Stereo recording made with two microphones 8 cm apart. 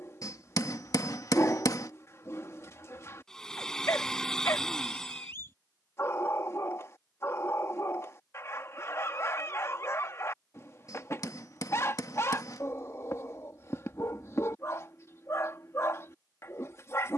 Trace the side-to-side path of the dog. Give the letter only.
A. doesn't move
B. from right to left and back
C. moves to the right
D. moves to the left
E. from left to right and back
A.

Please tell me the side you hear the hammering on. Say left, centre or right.
left.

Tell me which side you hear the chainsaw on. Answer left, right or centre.
centre.